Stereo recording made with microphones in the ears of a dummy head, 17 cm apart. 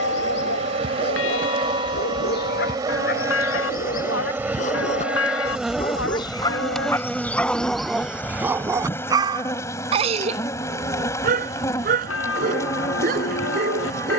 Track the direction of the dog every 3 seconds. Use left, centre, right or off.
left, left, centre, right, right.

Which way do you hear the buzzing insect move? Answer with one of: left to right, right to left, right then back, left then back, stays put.
right to left.